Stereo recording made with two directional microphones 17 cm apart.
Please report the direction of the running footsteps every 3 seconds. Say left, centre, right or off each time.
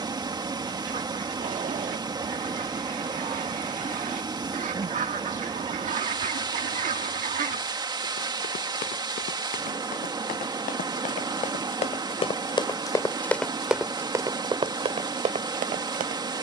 off, off, left, left, centre, right.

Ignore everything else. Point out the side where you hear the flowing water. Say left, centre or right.
right.